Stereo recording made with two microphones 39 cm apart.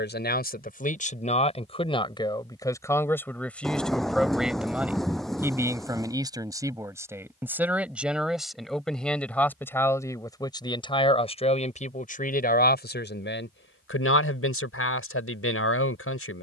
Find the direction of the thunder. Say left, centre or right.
centre.